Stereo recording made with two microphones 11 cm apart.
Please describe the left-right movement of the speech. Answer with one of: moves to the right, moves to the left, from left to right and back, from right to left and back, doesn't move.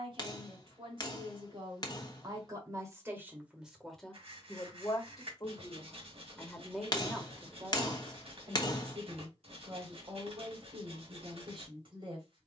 from right to left and back.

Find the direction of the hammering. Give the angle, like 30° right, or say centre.
40° left.